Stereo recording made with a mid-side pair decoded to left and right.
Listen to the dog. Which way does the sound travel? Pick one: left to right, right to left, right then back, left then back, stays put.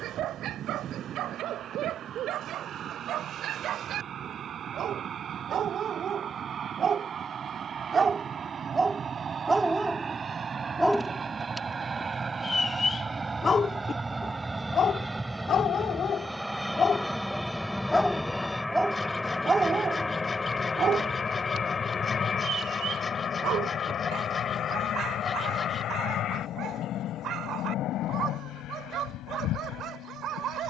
left then back.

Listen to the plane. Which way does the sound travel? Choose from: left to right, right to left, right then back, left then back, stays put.
right to left.